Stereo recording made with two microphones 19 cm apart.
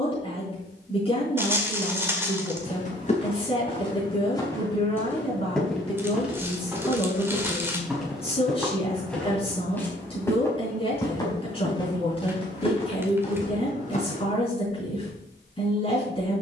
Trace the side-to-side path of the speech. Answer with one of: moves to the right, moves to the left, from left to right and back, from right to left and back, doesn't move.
doesn't move.